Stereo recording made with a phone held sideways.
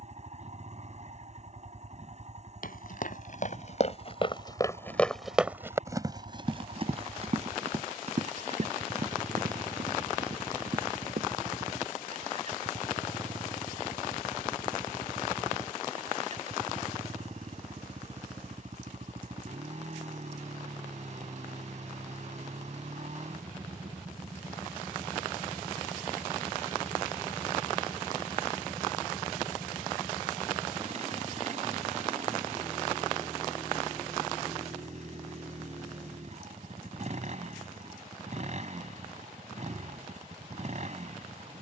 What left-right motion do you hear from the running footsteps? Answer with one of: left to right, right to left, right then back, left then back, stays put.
left to right.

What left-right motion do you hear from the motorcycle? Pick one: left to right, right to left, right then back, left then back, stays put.
stays put.